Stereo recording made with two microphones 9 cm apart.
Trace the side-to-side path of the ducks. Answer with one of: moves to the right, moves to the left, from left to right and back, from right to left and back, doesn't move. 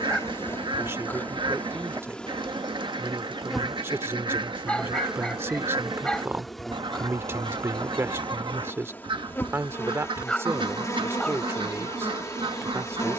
doesn't move.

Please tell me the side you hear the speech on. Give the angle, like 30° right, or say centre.
30° right.